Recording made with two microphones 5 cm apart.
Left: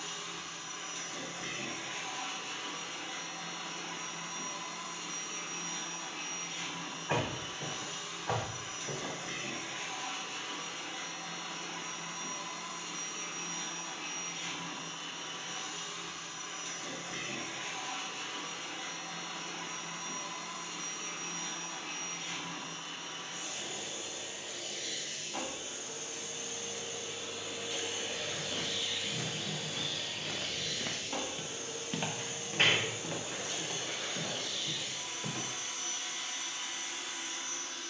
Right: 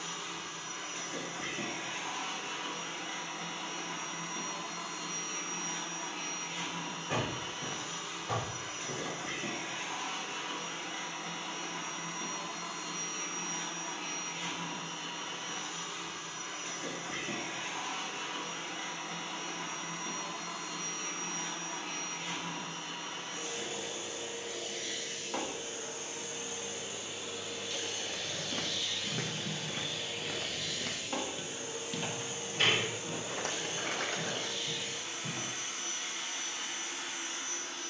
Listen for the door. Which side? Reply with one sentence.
You can hear the door on the left.